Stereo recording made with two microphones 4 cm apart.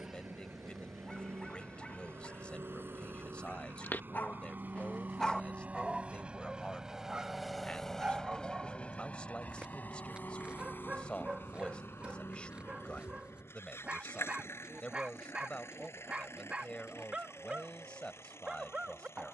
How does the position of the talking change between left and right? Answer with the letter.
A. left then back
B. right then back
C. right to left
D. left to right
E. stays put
E.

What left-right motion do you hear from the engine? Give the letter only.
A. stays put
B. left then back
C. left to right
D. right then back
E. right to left
E.